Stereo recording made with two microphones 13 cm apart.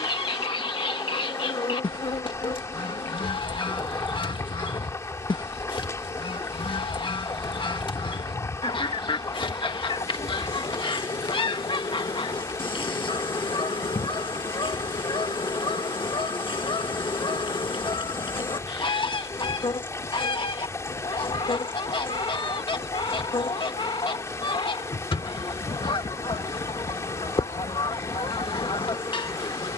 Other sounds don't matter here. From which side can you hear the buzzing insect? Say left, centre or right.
left.